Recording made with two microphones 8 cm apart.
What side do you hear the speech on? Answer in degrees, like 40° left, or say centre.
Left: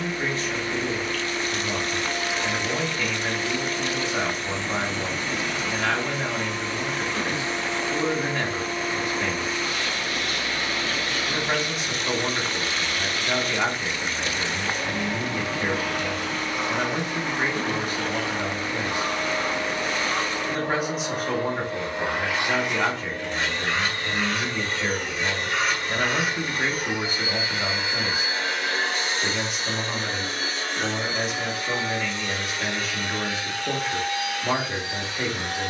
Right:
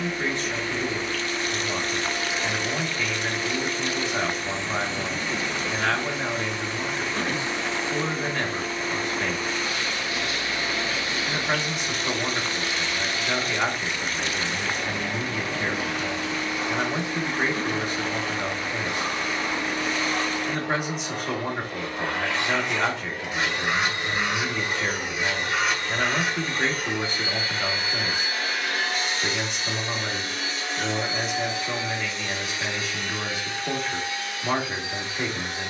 centre.